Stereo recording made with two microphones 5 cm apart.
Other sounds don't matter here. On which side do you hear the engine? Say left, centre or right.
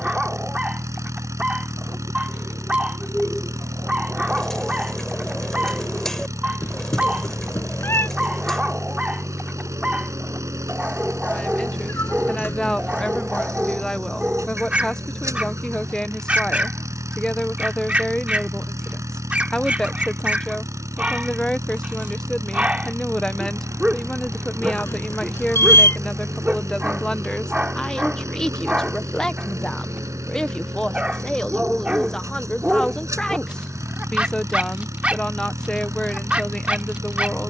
right.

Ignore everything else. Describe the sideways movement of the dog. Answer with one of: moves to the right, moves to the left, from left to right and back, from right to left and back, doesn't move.
doesn't move.